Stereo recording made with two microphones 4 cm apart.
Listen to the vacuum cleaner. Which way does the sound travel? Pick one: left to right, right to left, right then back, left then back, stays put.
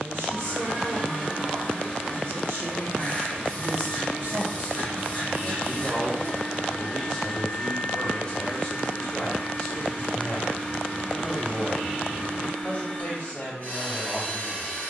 stays put.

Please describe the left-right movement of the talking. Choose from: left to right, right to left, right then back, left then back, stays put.
right to left.